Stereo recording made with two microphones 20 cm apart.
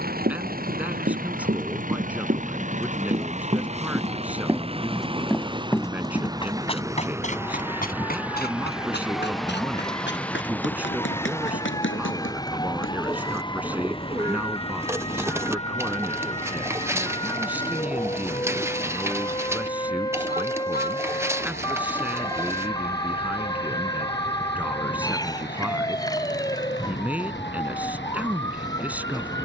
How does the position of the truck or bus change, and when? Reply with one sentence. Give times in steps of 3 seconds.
In this clip you hear the truck or bus on the right from 0 s, in the centre from 6 s and on the left from 12 s.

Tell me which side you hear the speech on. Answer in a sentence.
You can hear the speech in the centre.